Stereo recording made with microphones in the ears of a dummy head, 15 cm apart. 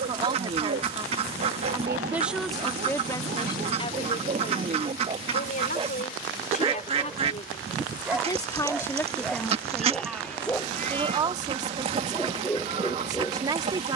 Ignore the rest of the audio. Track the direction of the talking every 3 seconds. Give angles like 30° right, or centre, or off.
10° right, 40° left, 30° left, 10° right, 30° right.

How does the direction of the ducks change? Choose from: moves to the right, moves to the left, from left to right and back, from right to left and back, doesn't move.
doesn't move.